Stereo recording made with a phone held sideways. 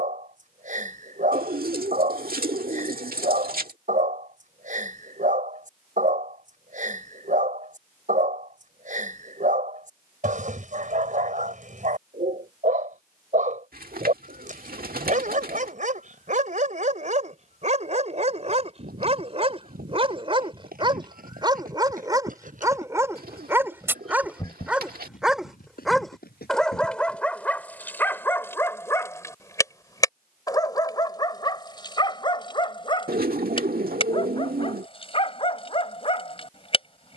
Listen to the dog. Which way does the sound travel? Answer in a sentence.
You can hear the dog travel towards the left.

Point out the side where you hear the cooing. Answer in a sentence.
You can hear the cooing on the right.